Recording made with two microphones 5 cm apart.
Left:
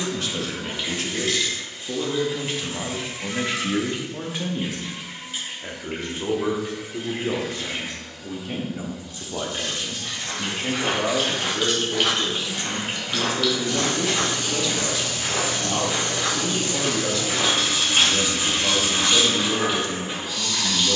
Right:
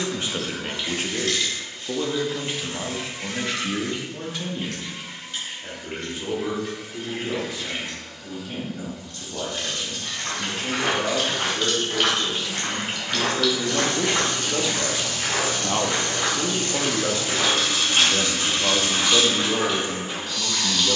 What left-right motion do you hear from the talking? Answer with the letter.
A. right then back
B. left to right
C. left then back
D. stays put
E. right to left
C.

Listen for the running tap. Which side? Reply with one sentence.
In this clip you hear the running tap in the centre.